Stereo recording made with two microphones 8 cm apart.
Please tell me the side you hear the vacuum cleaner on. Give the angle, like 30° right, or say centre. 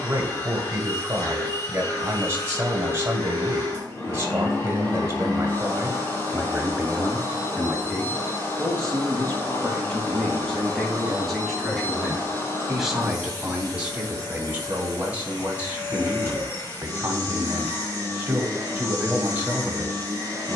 30° left.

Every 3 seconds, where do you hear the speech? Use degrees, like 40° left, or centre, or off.
30° right, 30° right, centre, 10° left, 10° right, 20° right, 20° right.